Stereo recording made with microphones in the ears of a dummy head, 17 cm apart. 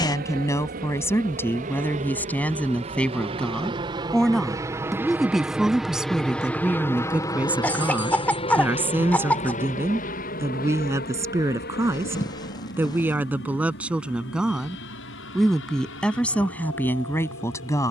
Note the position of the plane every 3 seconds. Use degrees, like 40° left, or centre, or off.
40° right, 20° right, 20° left, 50° left, 60° left, 70° left.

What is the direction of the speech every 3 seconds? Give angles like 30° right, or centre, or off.
10° left, centre, 10° right, 10° right, 10° right, 10° left.